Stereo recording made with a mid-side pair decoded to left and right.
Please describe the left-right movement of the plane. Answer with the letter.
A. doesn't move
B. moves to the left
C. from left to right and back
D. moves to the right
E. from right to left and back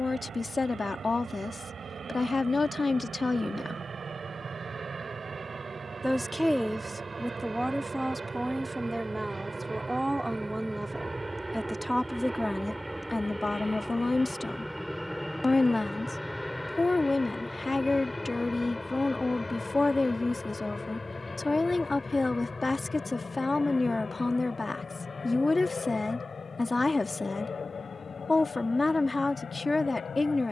B.